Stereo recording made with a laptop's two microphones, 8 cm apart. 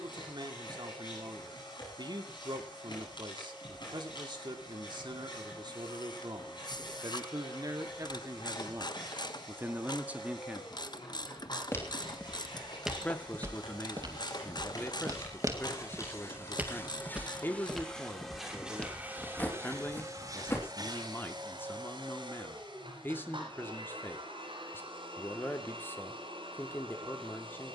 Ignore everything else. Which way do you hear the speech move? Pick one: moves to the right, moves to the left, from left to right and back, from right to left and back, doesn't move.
moves to the left.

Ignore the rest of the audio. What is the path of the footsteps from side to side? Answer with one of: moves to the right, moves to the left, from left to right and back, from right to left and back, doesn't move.
from left to right and back.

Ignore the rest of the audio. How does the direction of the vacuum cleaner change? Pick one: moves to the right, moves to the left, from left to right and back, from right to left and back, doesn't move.
moves to the right.